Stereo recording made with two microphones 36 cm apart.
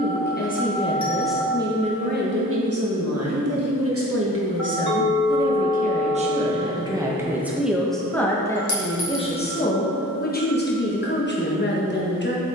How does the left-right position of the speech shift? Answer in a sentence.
You can hear the speech go right and come back.